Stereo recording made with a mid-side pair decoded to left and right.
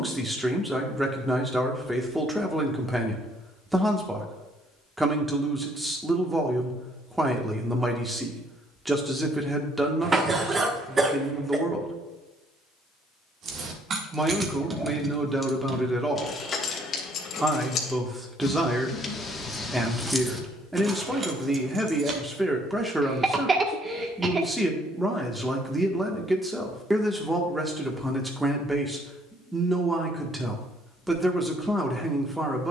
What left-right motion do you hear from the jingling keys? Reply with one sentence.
You can hear the jingling keys go left and come back.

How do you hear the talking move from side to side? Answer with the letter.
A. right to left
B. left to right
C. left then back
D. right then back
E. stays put
E.